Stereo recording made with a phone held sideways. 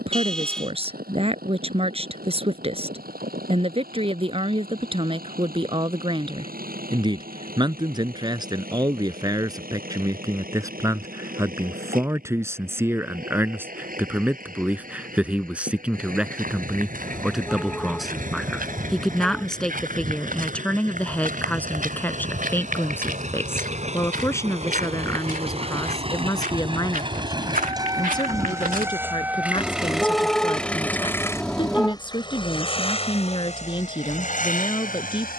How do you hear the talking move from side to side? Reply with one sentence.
In this clip you hear the talking move from right to left.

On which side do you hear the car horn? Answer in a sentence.
You can hear the car horn in the centre.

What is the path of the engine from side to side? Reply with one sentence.
You can hear the engine travel towards the left.